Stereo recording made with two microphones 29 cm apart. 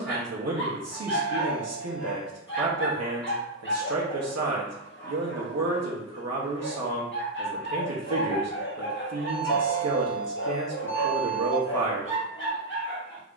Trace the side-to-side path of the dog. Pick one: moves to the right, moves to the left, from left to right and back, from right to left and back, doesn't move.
doesn't move.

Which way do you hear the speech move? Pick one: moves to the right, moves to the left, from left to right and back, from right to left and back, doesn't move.
doesn't move.